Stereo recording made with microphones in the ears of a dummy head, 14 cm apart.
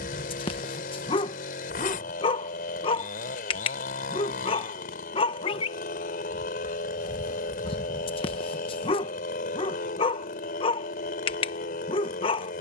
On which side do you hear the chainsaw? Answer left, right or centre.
left.